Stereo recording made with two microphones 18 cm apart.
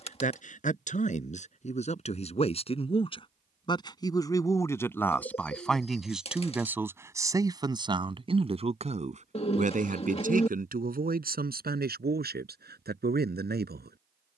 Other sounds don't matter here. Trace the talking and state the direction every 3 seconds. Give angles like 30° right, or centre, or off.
40° left, 10° left, 20° right, 50° right, 60° right.